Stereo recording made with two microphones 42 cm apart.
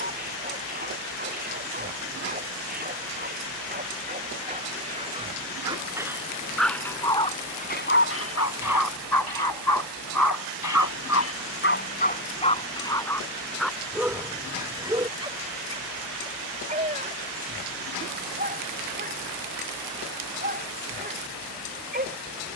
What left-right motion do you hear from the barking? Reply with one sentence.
In this clip you hear the barking go left and come back.